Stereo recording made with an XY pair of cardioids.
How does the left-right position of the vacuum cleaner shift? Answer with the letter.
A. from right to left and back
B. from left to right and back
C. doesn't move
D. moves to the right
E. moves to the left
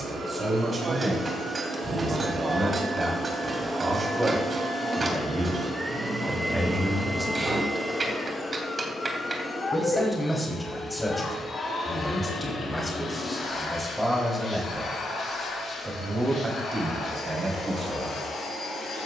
E.